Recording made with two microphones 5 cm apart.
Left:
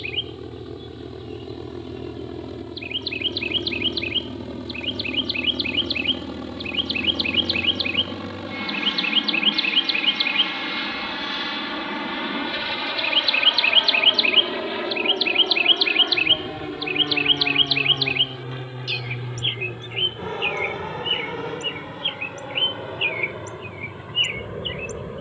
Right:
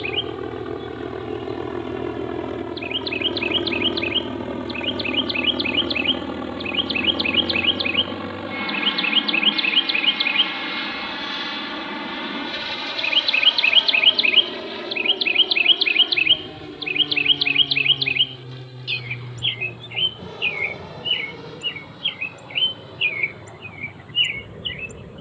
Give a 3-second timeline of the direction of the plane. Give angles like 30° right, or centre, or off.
50° right, 40° right, 20° right, centre, 10° left, 30° left, 40° left, 40° left, 50° left.